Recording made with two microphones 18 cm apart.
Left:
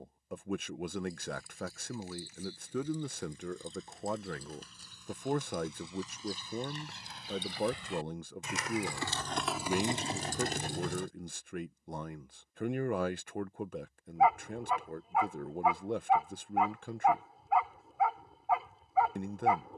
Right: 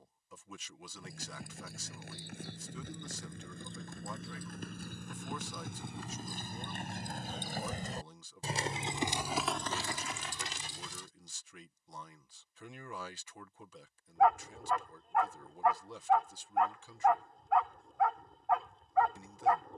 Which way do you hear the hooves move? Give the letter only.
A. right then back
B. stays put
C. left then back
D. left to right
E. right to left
E.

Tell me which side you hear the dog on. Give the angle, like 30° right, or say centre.
centre.